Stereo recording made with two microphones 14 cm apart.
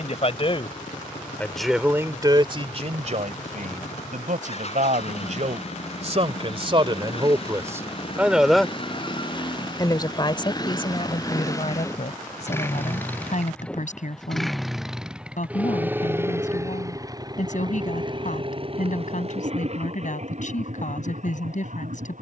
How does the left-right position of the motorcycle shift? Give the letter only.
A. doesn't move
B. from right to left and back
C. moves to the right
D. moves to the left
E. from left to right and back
C.